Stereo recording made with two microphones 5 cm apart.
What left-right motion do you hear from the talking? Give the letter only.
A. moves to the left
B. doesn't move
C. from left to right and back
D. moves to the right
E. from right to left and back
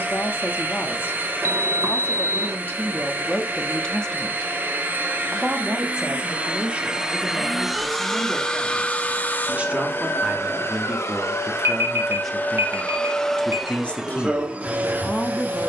C.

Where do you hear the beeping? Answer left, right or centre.
right.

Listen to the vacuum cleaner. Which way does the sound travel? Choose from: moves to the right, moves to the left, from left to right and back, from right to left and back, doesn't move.
from right to left and back.